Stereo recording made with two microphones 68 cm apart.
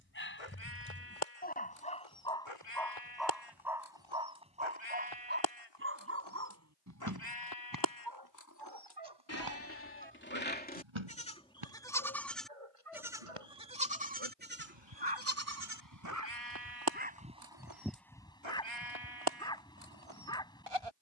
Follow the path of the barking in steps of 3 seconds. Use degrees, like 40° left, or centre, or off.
10° left, 10° right, 30° right, 40° right, 50° right, 20° right, 10° left.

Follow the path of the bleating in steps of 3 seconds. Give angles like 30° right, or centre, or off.
50° left, 40° left, 30° left, 10° left, 10° right, 30° right, 50° right.